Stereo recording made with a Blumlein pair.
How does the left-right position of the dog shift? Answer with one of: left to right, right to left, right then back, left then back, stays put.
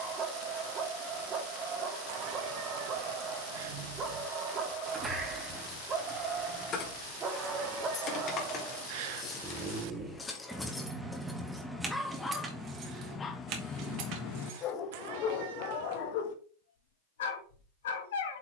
right to left.